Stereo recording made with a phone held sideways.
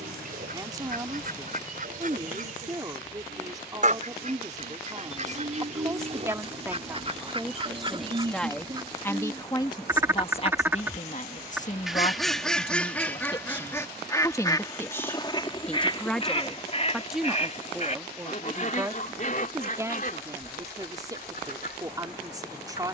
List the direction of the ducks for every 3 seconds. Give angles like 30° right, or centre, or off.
50° right, 50° right, 30° right, 10° right, 10° left, 40° left, 50° left, 60° left.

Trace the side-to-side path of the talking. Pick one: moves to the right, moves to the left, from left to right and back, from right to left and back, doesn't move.
from right to left and back.